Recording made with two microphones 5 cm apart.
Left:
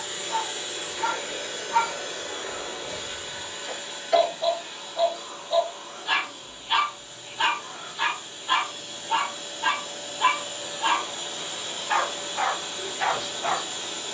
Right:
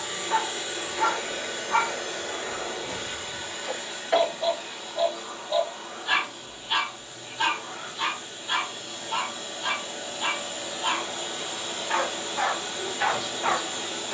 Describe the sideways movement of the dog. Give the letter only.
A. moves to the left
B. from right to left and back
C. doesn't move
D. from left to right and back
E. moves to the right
B.